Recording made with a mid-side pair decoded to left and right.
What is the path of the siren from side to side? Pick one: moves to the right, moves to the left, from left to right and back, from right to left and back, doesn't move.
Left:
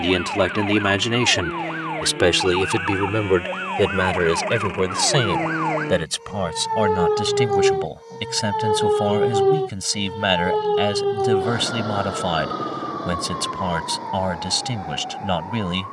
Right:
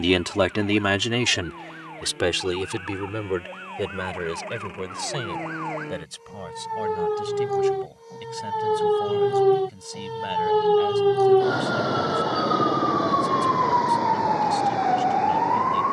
moves to the right.